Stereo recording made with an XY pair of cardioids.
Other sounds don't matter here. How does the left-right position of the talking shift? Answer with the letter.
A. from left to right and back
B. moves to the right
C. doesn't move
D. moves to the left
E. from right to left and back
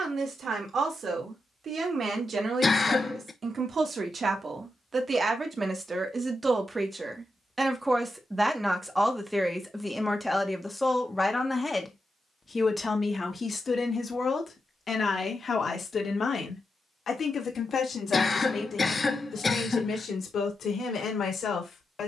D.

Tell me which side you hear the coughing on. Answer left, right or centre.
left.